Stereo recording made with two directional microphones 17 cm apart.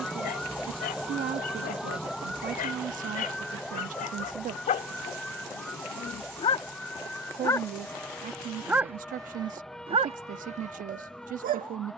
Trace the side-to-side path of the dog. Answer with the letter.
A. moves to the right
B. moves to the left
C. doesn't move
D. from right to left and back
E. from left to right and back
A.